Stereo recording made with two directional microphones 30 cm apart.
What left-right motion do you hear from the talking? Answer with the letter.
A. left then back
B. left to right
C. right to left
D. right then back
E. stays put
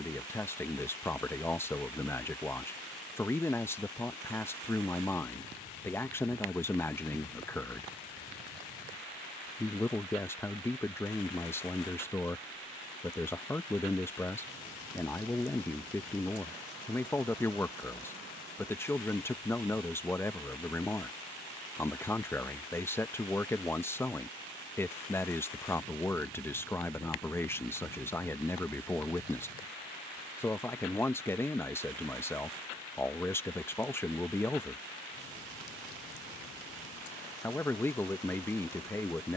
E.